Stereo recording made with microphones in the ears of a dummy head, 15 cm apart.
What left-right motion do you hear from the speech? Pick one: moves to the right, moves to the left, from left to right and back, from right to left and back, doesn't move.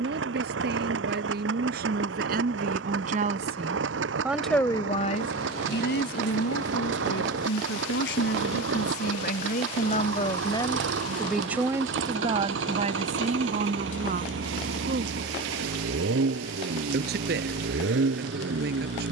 from right to left and back.